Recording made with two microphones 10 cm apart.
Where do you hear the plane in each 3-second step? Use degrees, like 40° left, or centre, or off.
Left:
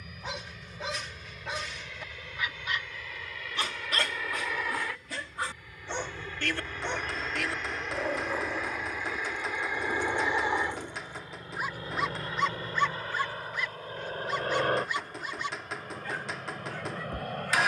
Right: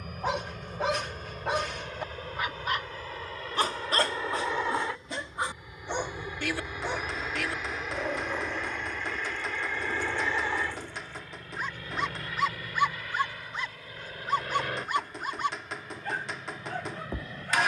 50° right, 30° right, 10° right, 20° left, 30° left, 40° left.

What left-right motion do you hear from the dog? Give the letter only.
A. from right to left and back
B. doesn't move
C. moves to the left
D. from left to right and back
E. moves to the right
A.